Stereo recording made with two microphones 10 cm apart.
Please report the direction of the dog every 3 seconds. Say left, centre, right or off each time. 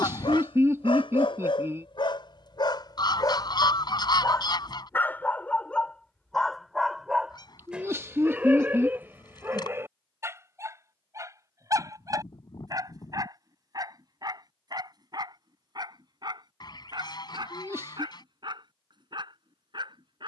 left, left, centre, right, right, right, right.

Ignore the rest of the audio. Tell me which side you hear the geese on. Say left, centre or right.
left.